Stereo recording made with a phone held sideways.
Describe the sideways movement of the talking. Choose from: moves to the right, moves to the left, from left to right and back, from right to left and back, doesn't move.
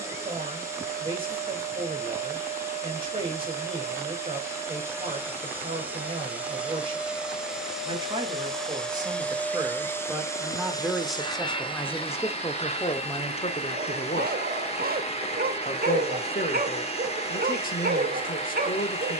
moves to the left.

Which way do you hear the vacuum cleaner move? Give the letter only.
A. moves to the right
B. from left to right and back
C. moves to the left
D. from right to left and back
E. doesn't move
C.